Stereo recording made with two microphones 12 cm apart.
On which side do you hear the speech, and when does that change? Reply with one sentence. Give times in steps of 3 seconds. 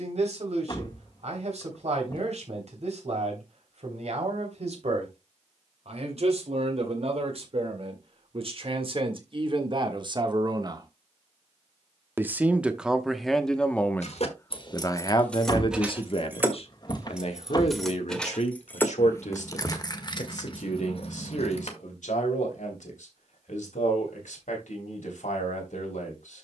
You can hear the speech on the right from 0 s, in the centre from 12 s and on the left from 15 s.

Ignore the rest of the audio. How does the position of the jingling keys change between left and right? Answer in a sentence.
You can hear the jingling keys go right and come back.